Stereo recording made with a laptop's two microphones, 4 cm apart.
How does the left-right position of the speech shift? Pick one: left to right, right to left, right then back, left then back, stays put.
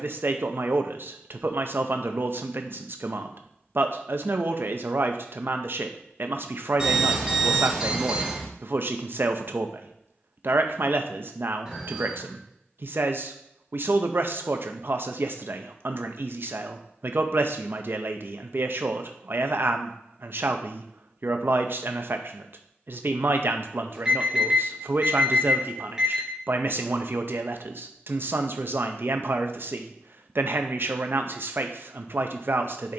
stays put.